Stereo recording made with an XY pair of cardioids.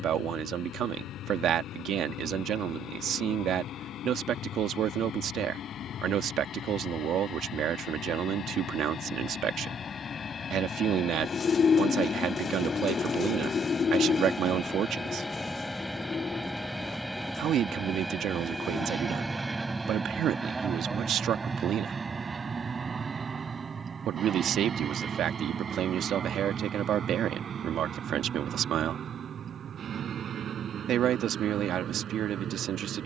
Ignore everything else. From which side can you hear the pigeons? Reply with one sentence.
In this clip you hear the pigeons on the left.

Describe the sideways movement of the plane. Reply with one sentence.
In this clip you hear the plane go from the left side to the right.